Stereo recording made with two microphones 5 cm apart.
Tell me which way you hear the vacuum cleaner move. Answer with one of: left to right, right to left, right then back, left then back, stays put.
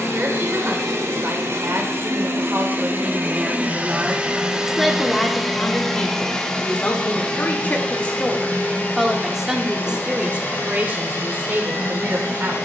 right to left.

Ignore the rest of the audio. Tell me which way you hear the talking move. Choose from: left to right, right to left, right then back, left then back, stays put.
left then back.